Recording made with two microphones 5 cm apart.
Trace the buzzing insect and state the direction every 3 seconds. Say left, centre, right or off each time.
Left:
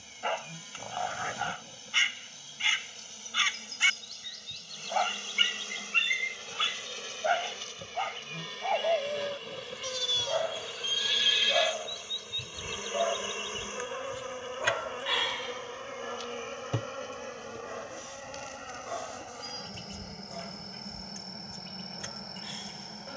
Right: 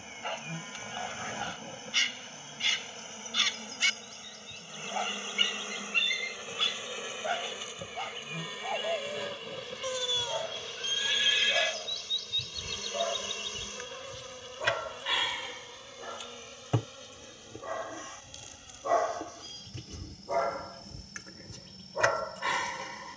right, right, centre, centre, left, left, left, left.